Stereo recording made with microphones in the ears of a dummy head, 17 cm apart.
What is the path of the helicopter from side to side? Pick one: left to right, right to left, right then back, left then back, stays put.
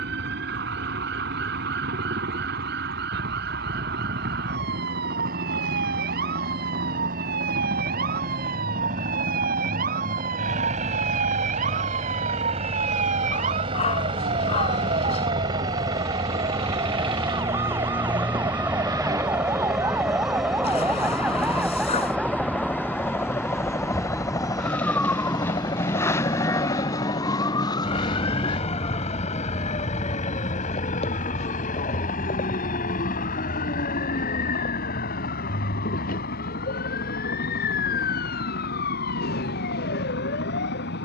right to left.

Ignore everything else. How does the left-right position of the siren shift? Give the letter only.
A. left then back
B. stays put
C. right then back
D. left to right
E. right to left
E.